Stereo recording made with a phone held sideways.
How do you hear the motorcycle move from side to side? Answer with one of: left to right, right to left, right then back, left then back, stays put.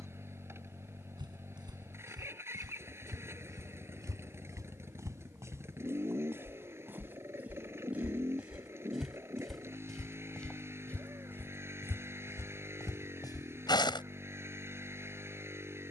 stays put.